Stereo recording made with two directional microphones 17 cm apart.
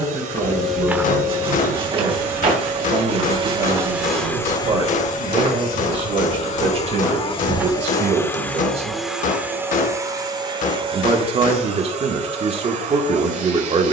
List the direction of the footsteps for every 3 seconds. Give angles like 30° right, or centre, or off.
20° right, 40° right, 20° right, off, off.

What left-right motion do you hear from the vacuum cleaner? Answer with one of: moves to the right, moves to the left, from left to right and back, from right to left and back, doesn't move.
from right to left and back.